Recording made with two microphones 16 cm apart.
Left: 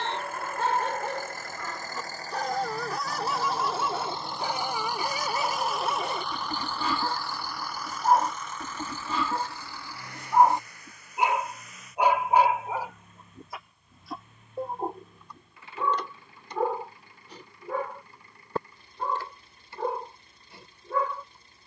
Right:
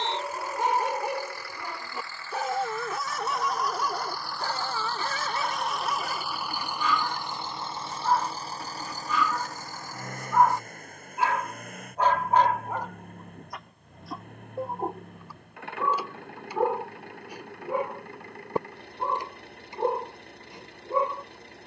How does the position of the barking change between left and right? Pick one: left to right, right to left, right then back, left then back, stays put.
left then back.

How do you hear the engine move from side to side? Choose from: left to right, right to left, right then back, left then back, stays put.
left to right.